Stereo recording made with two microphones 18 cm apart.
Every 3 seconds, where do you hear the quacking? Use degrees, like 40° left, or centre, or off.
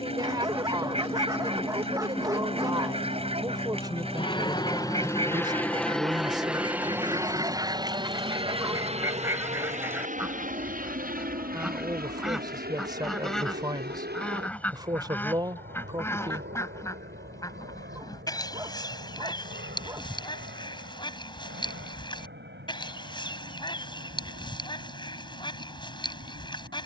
30° right, 30° right, 20° right, 10° right, centre, 20° left, 30° left, 30° left, 30° left.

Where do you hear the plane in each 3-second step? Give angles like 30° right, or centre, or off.
60° left, 30° left, 20° right, 50° right, 60° right, 70° right, 70° right, 70° right, 70° right.